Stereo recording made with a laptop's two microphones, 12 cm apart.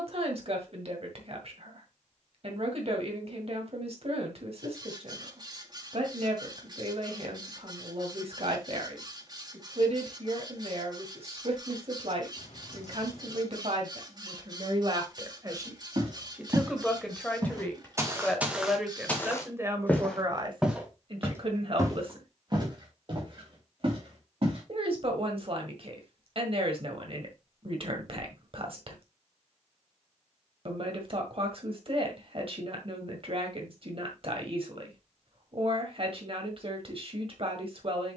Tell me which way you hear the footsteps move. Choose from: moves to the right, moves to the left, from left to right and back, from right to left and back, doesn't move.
from right to left and back.